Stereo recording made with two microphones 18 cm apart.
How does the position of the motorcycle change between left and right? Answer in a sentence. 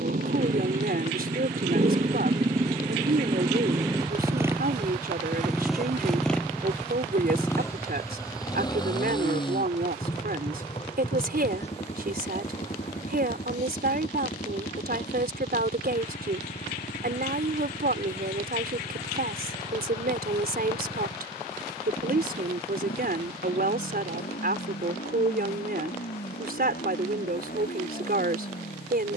In this clip you hear the motorcycle go from the right side to the left.